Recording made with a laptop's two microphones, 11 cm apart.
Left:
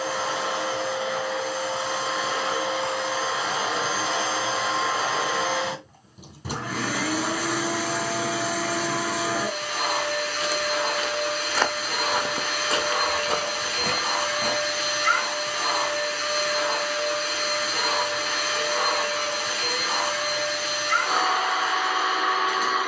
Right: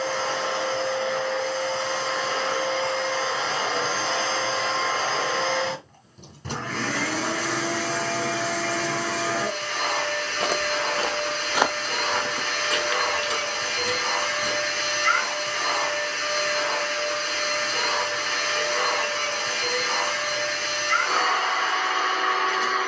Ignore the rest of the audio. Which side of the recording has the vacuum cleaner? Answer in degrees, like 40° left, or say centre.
10° left.